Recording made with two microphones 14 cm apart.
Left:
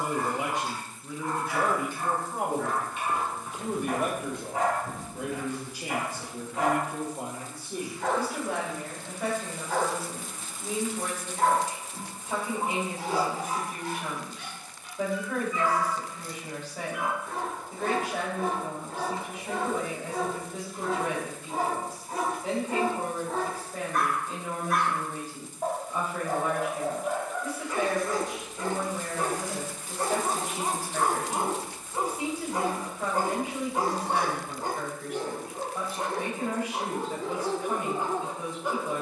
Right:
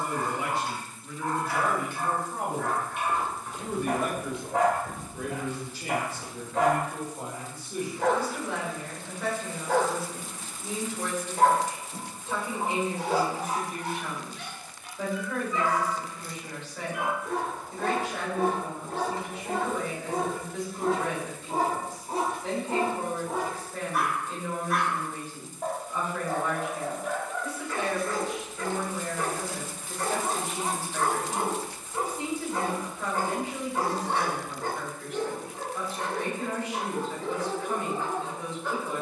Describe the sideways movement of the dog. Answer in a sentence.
You can hear the dog move from right to left.